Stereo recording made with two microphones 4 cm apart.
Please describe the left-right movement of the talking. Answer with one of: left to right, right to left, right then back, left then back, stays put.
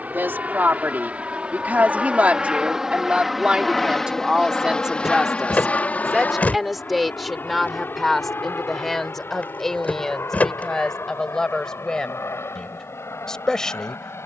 right to left.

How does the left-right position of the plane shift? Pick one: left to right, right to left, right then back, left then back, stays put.
right to left.